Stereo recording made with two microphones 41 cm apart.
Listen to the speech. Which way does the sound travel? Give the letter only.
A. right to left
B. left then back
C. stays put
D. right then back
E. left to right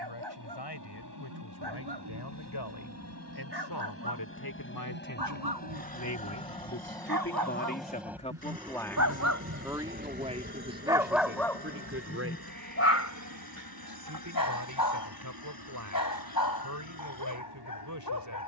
E.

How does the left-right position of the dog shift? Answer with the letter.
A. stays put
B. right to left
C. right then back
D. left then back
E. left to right
B.